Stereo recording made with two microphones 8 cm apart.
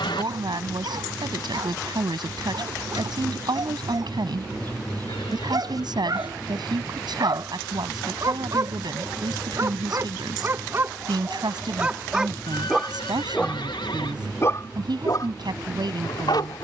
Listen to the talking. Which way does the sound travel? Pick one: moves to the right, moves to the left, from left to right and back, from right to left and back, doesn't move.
doesn't move.